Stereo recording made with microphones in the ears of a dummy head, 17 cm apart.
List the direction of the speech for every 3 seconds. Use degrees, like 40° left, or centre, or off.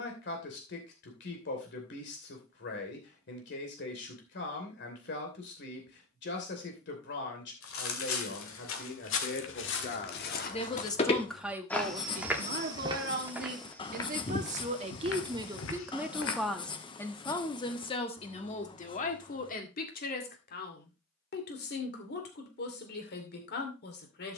60° left, 60° left, 60° left, 30° left, 40° right, centre, 40° left, 60° left.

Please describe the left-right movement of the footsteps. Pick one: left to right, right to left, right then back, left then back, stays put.
right then back.